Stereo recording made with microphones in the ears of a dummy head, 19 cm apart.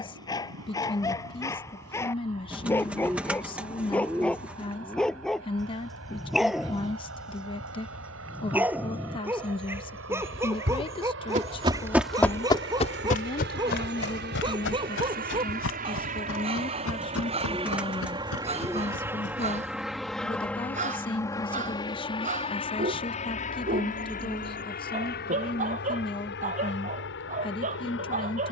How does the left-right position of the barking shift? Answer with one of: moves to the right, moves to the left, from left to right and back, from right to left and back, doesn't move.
moves to the right.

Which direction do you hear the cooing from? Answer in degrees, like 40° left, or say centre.
10° right.